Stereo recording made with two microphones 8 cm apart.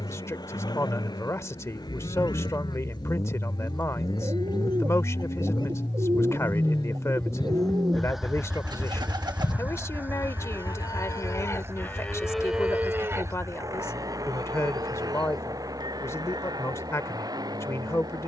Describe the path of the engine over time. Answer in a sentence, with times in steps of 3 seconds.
In this clip you hear the engine on the left from 0 s, in the centre from 6 s and on the right from 9 s.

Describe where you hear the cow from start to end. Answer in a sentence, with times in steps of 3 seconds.
You can hear the cow on the left from 0 s and on the right from 12 s.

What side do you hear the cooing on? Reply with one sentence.
In this clip you hear the cooing on the right.